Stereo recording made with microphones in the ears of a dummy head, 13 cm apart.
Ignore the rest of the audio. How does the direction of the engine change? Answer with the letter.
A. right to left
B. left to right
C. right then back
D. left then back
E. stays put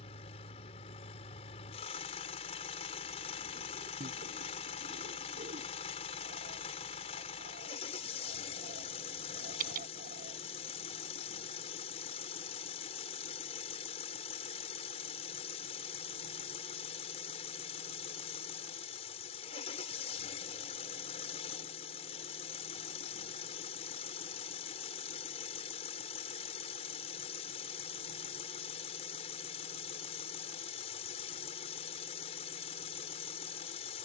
E.